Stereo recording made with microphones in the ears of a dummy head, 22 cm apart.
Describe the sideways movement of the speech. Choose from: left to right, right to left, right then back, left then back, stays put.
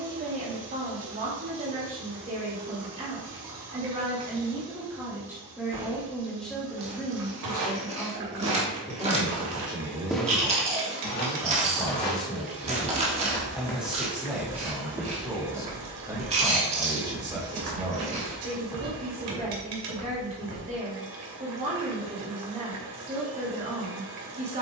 left then back.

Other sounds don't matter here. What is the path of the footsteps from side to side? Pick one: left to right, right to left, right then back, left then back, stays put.
left then back.